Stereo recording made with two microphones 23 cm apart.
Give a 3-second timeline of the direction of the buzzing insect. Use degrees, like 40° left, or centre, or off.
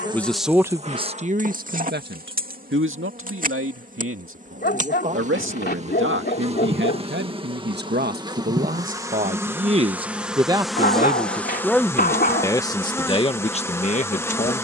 30° right, 30° right, 20° right, centre, 10° left.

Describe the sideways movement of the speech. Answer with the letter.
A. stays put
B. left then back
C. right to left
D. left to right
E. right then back
E.